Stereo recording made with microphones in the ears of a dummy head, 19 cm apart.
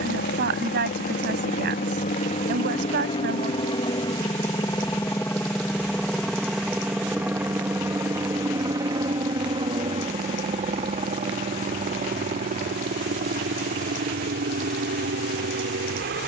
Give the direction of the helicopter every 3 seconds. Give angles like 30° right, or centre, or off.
40° left, 20° left, 10° right, 30° right, 40° right, 50° right.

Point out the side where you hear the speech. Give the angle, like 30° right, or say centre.
50° right.